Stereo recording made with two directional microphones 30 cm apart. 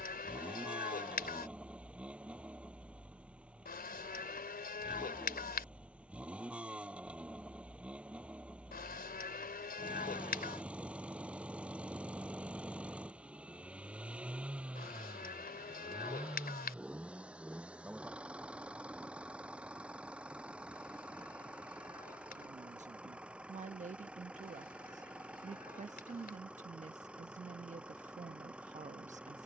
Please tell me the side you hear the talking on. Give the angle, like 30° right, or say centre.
20° right.